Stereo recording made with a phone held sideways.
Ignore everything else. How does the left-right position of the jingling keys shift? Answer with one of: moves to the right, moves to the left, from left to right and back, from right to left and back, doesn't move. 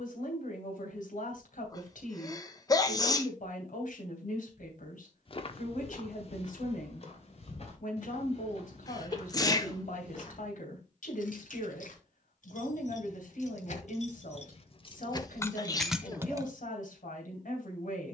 moves to the right.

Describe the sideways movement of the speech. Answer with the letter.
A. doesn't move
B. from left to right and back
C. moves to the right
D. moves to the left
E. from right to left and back
A.